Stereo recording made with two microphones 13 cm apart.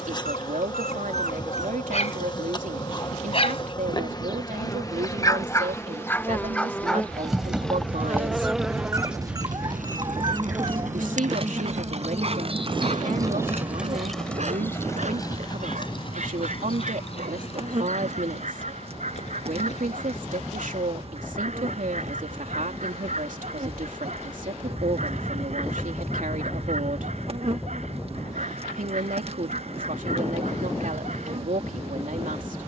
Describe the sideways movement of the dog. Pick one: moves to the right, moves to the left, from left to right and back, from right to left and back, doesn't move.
moves to the right.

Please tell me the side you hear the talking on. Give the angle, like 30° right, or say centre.
80° right.